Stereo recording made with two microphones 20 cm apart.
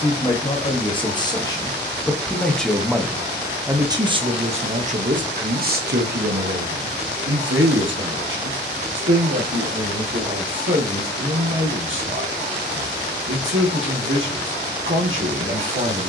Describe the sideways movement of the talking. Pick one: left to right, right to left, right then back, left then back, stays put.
left to right.